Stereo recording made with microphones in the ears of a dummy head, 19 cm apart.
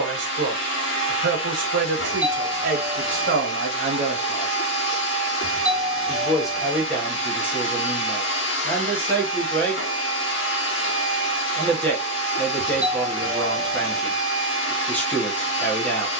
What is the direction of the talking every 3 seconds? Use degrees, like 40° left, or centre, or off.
50° right, 40° right, 10° left, 10° left, 10° left, 10° left.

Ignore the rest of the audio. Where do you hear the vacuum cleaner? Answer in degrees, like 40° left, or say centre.
60° left.